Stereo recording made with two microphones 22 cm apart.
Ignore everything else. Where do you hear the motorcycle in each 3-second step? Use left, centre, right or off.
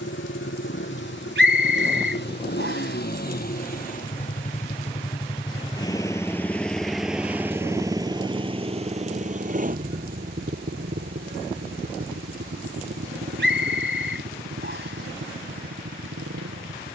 left, left, centre, right, right, right.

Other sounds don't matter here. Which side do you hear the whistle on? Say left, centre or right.
right.